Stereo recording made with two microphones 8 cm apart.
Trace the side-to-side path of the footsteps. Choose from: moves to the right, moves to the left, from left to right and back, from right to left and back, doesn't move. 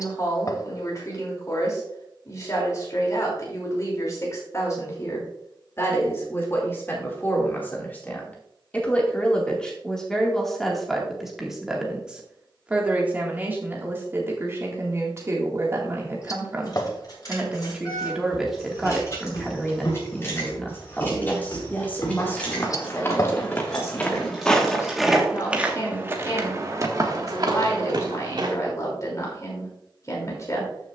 moves to the right.